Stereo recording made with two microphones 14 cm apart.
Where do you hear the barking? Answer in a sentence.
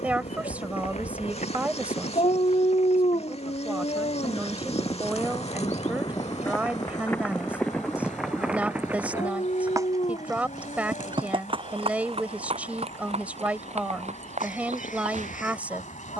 In this clip you hear the barking on the left.